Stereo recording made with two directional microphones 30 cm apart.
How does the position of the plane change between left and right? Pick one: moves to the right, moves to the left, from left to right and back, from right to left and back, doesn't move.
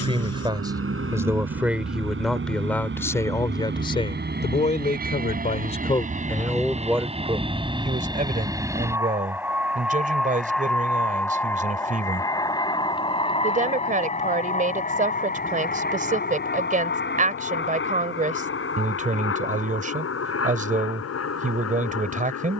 moves to the left.